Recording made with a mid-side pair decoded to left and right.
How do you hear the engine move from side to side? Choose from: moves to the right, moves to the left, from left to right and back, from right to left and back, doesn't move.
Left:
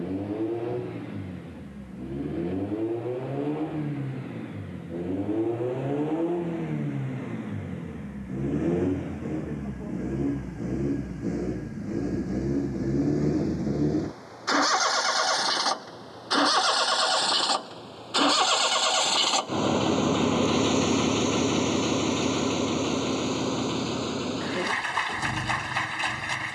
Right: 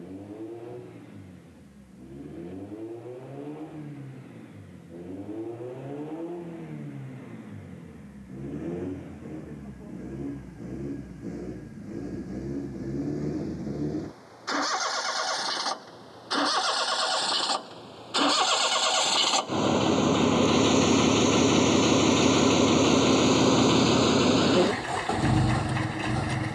moves to the right.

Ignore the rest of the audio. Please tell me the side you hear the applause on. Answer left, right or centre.
left.